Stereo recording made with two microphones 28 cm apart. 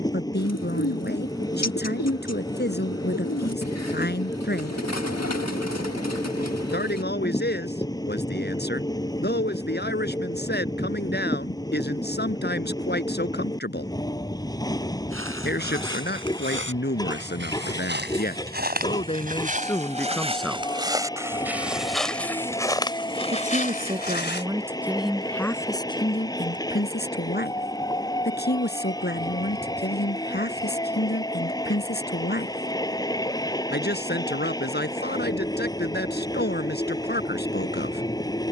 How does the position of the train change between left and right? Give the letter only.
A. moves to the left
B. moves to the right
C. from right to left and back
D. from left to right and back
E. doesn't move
E.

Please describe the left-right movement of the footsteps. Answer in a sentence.
In this clip you hear the footsteps travel towards the left.